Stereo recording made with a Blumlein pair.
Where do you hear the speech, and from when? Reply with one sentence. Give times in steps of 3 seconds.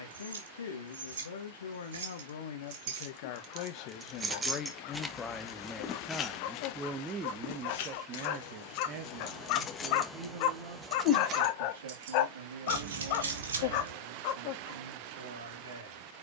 You can hear the speech on the left from 0 s and on the right from 6 s.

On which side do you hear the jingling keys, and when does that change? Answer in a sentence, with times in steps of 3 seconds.
You can hear the jingling keys on the right from 0 s, in the centre from 3 s, on the left from 6 s, in the centre from 9 s, on the right from 12 s and not at all from 15 s.